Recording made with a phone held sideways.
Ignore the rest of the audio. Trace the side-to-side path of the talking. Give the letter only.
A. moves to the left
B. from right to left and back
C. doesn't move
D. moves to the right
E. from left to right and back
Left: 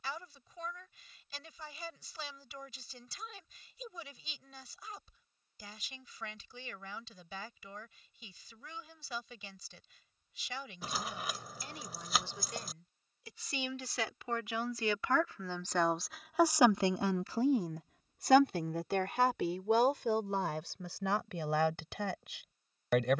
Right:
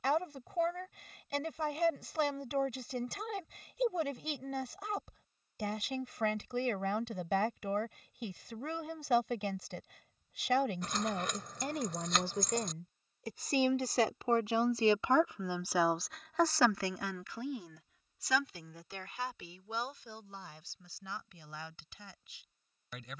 A.